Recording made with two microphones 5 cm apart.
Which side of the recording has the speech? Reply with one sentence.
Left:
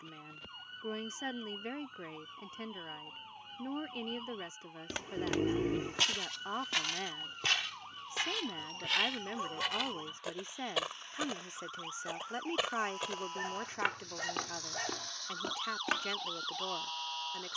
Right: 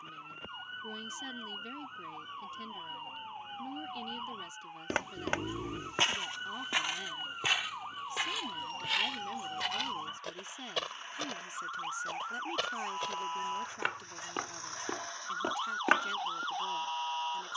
In this clip you hear the speech on the left.